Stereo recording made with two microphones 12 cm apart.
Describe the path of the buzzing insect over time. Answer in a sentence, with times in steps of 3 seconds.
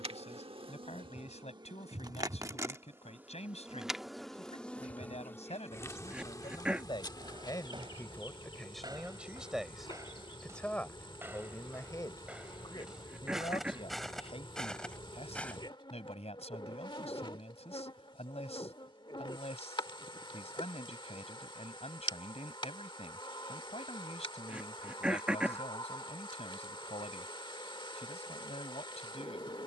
You can hear the buzzing insect on the right from 0 s, in the centre from 3 s and on the left from 6 s.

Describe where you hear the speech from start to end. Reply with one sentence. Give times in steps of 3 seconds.
In this clip you hear the speech on the left from 0 s, in the centre from 9 s and on the left from 12 s.